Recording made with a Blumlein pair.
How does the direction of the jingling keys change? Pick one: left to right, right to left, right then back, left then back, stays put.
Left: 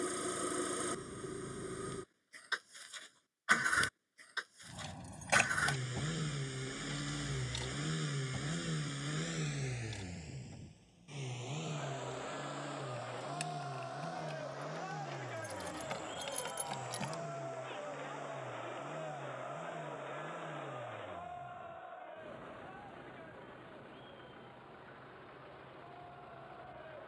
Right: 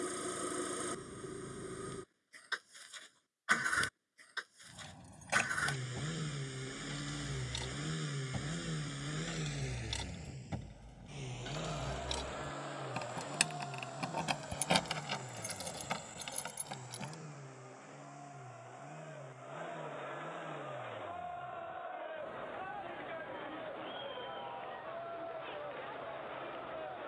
right then back.